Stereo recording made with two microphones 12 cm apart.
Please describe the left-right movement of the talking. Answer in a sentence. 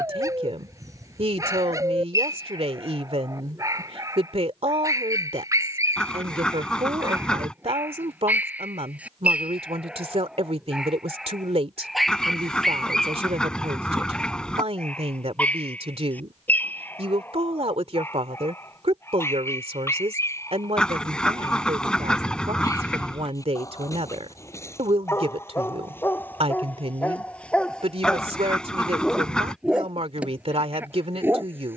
In this clip you hear the talking stay in one place.